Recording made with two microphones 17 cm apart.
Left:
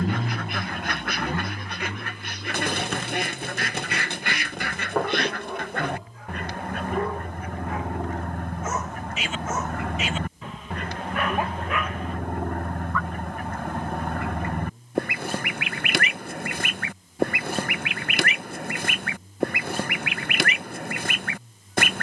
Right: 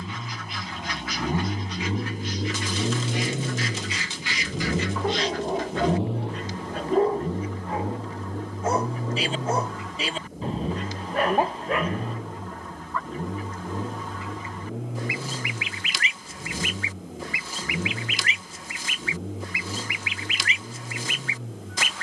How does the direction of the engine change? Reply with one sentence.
You can hear the engine move from left to right.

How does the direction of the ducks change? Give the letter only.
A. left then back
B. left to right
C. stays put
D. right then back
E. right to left
C.